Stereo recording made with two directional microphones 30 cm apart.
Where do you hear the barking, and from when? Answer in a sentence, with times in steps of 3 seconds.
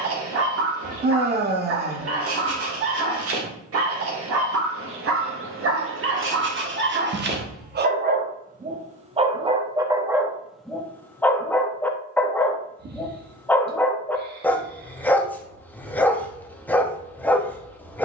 You can hear the barking on the right from 0 s and in the centre from 9 s.